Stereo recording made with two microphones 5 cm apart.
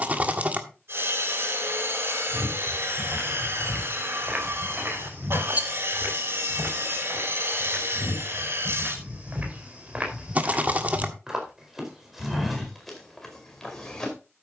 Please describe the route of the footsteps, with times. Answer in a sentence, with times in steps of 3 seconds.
In this clip you hear the footsteps in the centre from 0 s, on the right from 3 s and in the centre from 12 s.